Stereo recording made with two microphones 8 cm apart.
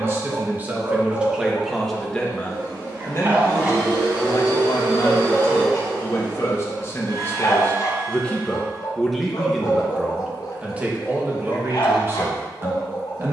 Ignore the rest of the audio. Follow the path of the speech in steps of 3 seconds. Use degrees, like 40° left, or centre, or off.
10° right, 50° left, 30° left, 10° right, 30° right.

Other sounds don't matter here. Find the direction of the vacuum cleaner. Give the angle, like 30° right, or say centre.
70° right.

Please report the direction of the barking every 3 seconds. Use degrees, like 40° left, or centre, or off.
30° right, 10° right, 40° left, 70° left, 80° left.